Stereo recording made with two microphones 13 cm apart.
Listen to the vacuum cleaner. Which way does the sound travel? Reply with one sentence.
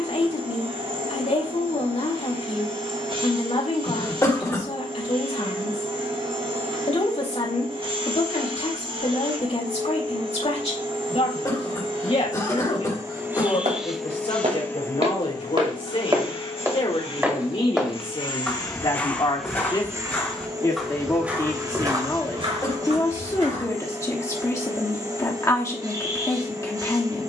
You can hear the vacuum cleaner go left and come back.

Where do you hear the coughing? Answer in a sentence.
In this clip you hear the coughing on the left.